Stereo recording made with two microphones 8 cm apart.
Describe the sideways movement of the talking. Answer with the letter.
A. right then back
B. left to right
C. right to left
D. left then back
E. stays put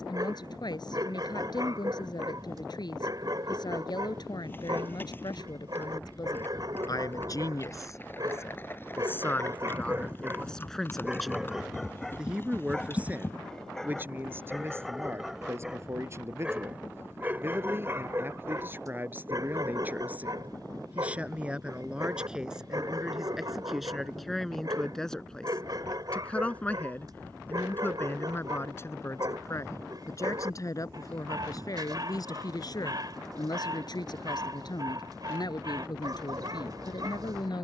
A.